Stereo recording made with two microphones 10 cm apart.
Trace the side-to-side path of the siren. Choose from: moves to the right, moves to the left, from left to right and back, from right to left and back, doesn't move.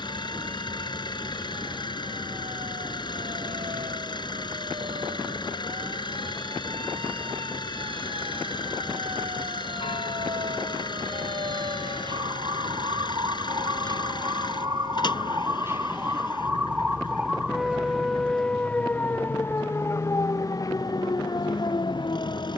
moves to the left.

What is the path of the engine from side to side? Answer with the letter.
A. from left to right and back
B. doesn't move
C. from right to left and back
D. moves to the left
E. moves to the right
B.